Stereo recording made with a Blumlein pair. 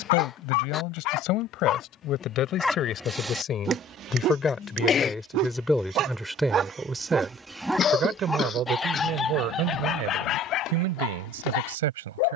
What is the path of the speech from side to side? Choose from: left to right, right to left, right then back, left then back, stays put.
left to right.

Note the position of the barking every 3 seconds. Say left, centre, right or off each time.
left, right, centre, left.